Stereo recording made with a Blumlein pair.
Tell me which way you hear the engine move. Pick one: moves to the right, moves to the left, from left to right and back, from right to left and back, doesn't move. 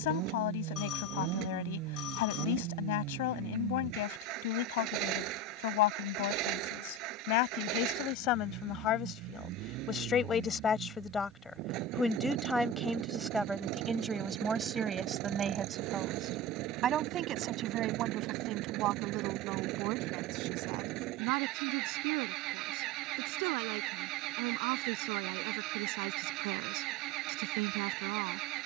doesn't move.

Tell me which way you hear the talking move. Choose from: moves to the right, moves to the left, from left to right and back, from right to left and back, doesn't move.
moves to the right.